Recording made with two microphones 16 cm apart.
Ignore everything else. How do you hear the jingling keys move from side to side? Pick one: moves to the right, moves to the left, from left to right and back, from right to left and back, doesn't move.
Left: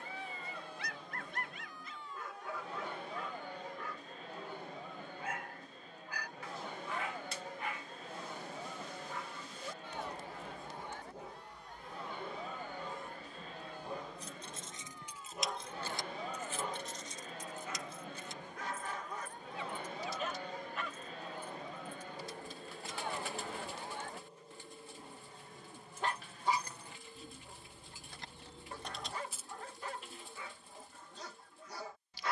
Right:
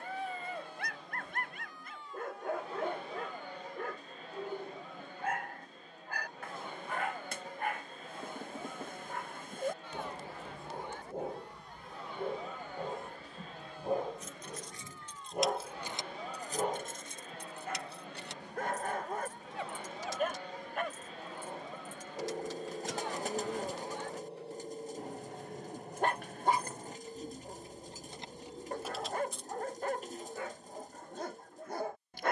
from left to right and back.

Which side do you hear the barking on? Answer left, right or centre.
right.